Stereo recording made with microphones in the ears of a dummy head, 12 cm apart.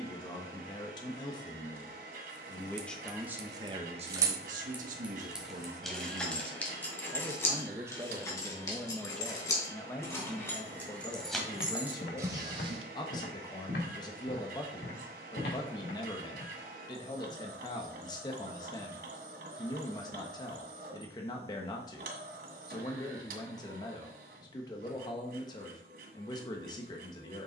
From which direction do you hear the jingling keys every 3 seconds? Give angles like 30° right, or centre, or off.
50° right, 10° right, 20° left, 10° left, 30° right, off, off, off, off.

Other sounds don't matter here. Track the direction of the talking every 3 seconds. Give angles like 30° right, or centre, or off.
30° left, 40° right, 20° right, 20° left, 30° left, 30° left, 30° left, 30° left, 30° left.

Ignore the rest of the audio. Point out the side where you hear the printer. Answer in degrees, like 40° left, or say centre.
70° right.